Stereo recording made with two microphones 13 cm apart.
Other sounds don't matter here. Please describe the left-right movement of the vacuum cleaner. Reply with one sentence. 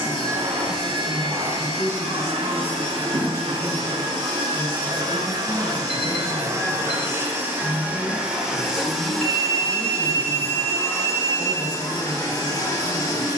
You can hear the vacuum cleaner go from the right side to the left.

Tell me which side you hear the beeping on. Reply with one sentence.
In this clip you hear the beeping on the right.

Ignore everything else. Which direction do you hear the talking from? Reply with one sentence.
In this clip you hear the talking on the left.